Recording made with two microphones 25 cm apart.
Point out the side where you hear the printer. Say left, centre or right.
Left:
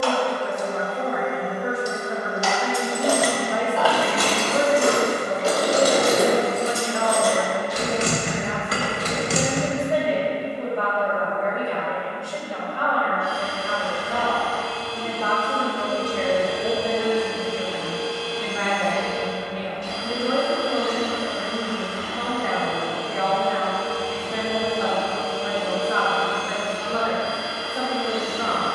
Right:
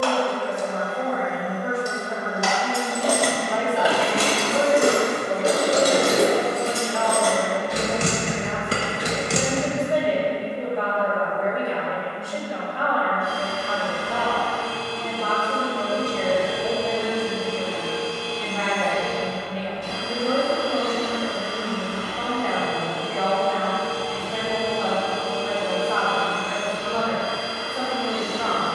right.